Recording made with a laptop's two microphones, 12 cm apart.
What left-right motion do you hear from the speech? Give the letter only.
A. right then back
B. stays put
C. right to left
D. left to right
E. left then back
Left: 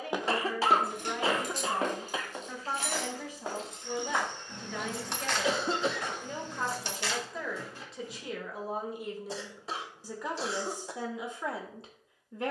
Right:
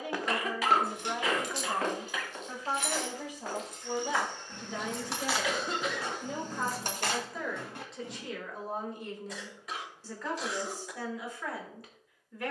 C.